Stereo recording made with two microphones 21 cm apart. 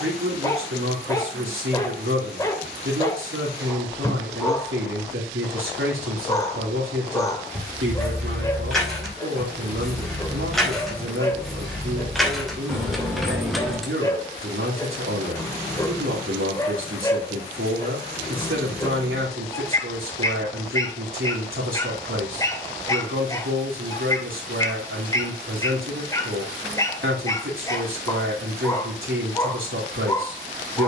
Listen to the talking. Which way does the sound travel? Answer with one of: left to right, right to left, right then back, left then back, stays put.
stays put.